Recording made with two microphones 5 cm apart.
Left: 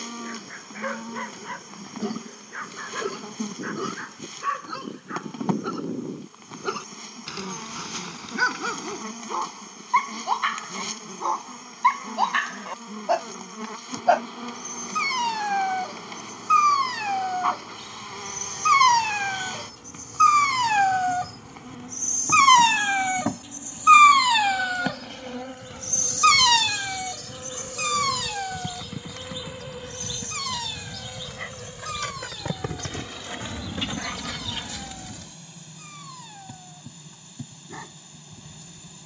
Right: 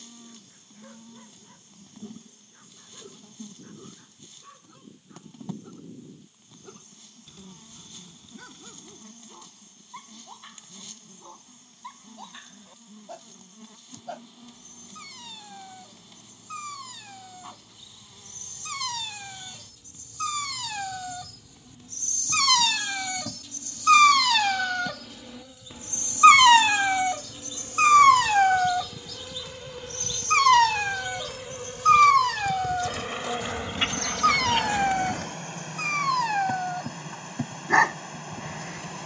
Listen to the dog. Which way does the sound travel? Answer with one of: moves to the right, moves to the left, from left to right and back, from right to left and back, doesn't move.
moves to the right.